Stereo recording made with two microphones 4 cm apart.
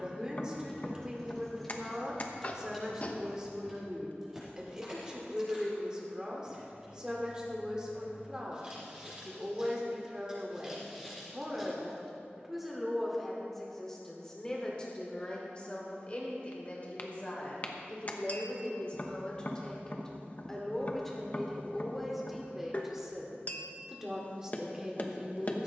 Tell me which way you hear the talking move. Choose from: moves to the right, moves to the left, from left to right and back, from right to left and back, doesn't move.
from right to left and back.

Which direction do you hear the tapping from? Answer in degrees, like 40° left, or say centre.
40° left.